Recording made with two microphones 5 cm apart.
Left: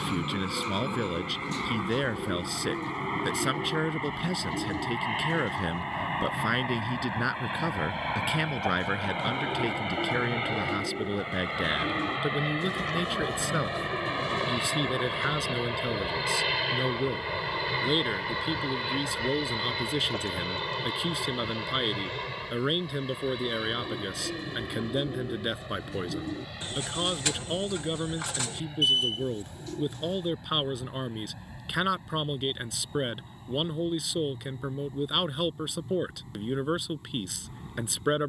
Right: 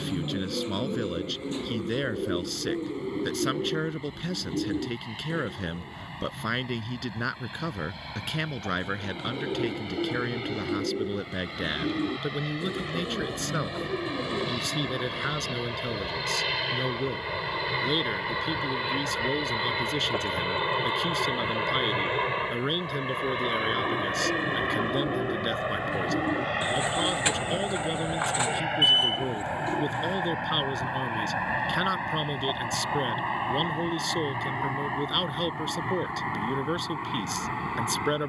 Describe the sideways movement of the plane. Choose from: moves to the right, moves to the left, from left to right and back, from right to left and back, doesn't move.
moves to the right.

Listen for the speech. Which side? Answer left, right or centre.
centre.